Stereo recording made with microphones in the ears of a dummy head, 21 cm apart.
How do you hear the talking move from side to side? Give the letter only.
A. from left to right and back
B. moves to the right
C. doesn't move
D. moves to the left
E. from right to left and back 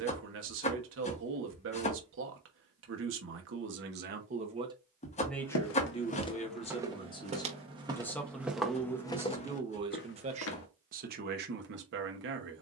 E.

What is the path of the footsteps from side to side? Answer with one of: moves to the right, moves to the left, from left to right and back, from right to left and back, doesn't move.
from left to right and back.